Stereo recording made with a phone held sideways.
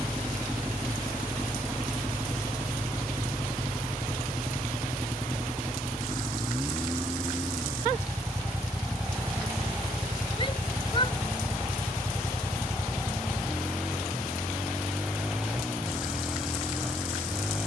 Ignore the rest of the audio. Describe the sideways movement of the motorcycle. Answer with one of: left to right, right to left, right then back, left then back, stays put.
stays put.